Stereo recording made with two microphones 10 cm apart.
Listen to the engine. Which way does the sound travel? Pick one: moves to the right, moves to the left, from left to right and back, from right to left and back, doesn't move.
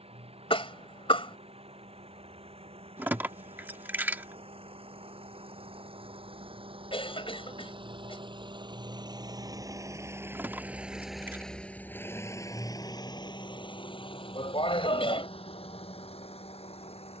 moves to the left.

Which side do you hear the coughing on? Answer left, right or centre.
left.